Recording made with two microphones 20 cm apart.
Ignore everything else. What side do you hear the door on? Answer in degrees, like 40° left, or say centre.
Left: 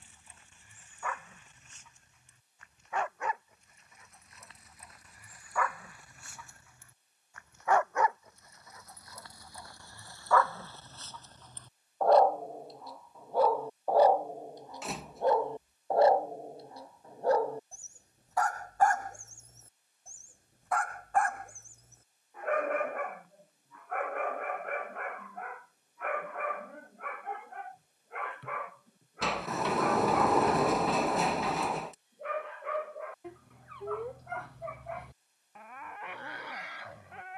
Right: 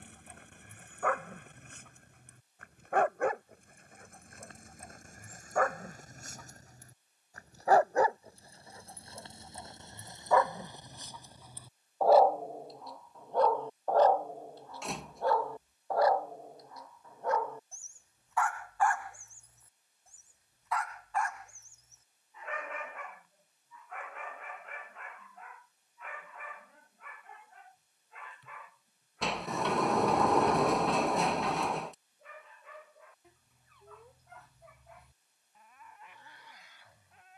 centre.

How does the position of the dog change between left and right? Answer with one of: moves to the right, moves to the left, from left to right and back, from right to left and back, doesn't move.
moves to the left.